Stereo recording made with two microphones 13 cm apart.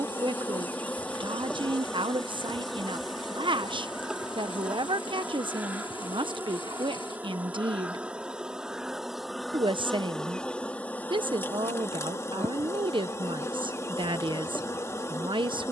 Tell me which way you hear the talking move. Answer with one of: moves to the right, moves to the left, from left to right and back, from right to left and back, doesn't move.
doesn't move.